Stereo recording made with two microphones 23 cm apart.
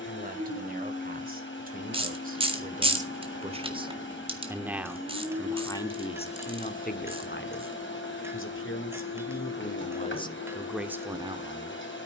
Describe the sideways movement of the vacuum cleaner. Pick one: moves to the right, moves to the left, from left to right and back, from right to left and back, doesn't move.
doesn't move.